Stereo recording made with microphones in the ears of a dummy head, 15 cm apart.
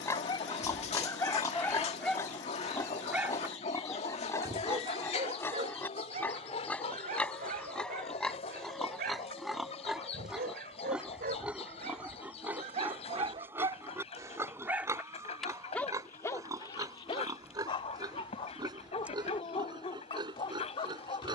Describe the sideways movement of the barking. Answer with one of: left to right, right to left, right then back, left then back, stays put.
right then back.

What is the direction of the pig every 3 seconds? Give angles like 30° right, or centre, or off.
20° left, 20° left, 10° left, centre, 10° right, 20° right, 30° right.